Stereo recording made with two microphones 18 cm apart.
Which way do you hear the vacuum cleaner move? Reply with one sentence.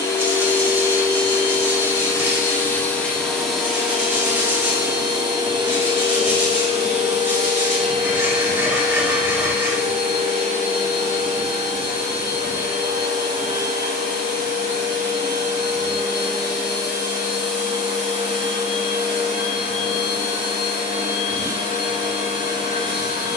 You can hear the vacuum cleaner move to the right.